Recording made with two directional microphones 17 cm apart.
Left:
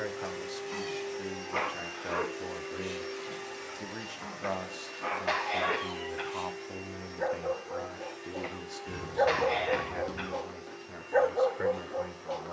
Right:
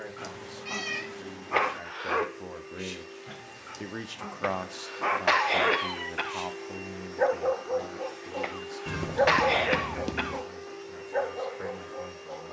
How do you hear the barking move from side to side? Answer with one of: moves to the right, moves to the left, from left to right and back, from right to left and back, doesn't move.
moves to the left.